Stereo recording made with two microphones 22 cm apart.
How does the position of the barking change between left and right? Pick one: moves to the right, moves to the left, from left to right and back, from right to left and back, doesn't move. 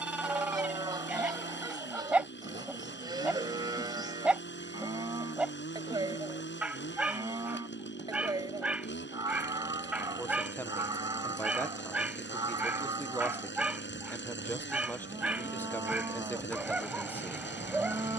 doesn't move.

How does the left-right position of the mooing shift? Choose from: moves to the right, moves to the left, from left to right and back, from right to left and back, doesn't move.
doesn't move.